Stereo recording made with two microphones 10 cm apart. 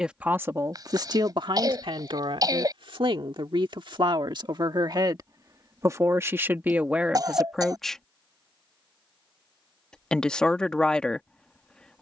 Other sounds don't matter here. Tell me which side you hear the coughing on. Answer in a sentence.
In this clip you hear the coughing on the right.